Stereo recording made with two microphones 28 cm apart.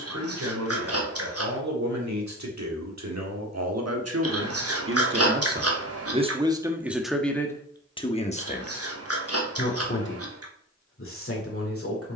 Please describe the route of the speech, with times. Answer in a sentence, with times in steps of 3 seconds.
In this clip you hear the speech on the right from 0 s, in the centre from 6 s and on the left from 9 s.